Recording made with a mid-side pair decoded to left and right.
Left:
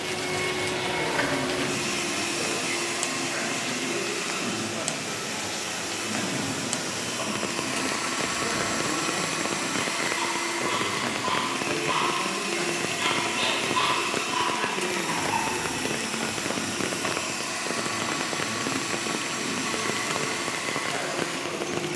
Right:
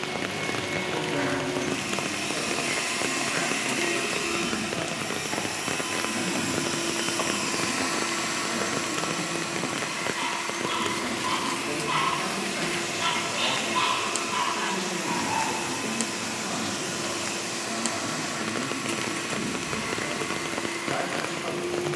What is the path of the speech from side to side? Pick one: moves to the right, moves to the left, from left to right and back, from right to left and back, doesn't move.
from right to left and back.